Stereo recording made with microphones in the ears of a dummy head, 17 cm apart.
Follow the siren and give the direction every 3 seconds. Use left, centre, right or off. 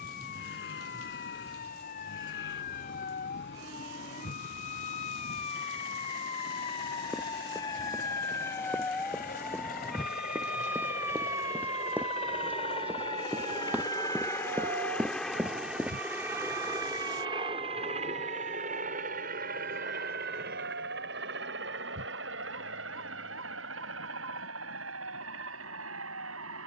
left, left, left, centre, right, right, right, right, right.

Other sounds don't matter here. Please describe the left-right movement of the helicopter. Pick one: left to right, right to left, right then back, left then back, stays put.
left to right.